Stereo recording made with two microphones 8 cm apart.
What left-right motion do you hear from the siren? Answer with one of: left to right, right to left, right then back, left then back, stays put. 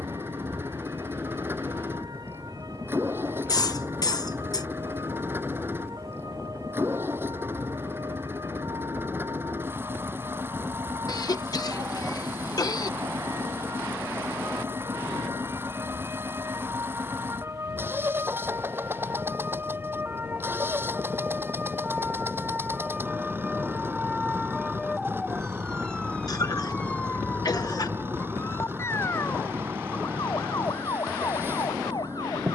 right to left.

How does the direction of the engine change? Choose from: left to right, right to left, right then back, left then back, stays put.
stays put.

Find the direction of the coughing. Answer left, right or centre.
left.